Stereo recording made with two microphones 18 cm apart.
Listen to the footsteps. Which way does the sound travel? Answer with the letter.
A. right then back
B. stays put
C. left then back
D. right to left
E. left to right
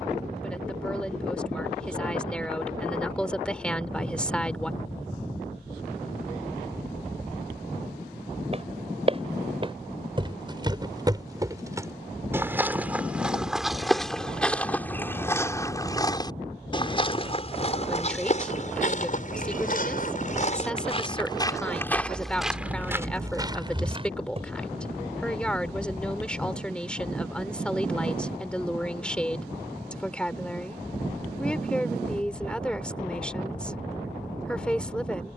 C.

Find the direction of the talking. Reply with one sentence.
In this clip you hear the talking in the centre.